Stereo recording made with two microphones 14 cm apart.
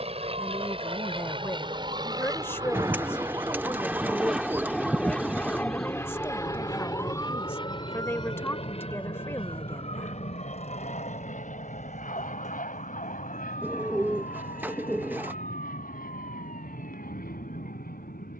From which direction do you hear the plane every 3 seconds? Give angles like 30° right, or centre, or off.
40° right, centre, 30° left, 50° left, 60° left, 70° left.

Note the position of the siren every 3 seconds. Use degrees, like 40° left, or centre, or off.
50° right, 20° right, 20° left, 40° left, 50° left, 60° left.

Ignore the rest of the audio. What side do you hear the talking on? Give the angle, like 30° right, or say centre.
20° left.